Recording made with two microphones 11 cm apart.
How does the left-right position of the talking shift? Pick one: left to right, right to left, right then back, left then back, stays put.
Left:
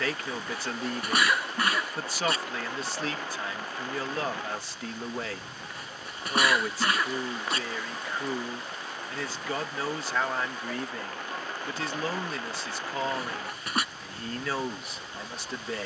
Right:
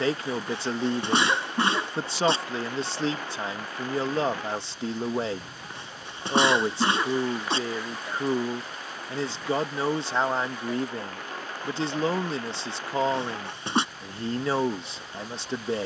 stays put.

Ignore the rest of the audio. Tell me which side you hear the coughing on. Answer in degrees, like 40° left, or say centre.
30° right.